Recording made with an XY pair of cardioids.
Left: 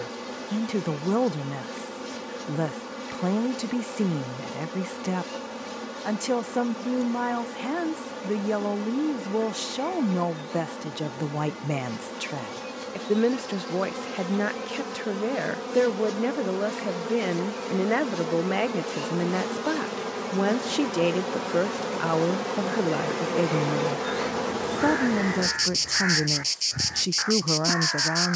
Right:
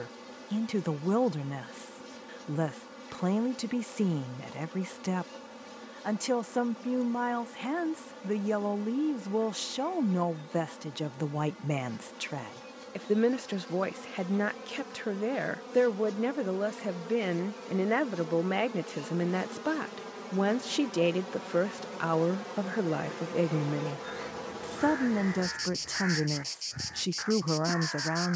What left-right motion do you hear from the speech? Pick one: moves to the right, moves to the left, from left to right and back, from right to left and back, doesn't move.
doesn't move.